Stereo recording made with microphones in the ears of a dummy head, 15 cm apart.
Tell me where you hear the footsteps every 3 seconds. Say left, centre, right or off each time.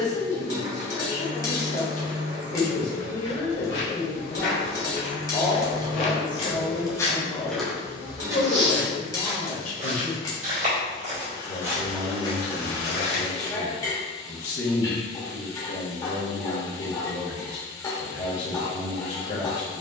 off, left, centre, right, left, off, off.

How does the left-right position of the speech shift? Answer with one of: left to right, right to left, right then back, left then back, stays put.
stays put.